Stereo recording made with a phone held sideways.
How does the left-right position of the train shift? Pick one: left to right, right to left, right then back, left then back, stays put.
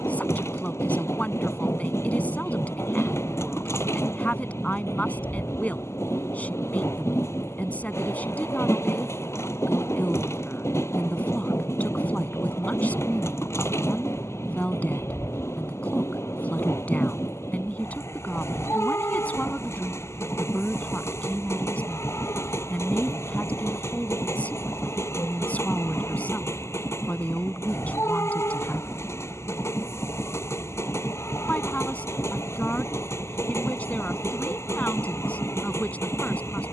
stays put.